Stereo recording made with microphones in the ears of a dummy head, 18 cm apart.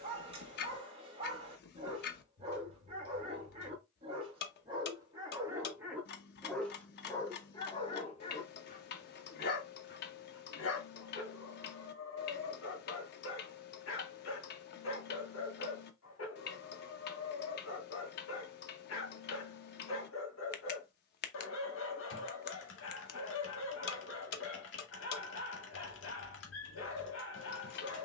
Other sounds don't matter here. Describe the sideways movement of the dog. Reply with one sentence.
In this clip you hear the dog go from the right side to the left.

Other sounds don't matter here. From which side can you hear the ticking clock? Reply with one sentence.
You can hear the ticking clock on the left.